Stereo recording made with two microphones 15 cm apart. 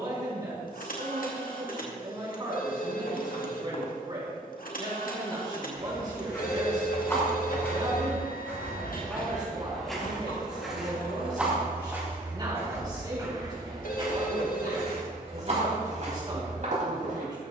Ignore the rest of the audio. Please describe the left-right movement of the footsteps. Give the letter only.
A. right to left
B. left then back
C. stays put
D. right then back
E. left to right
E.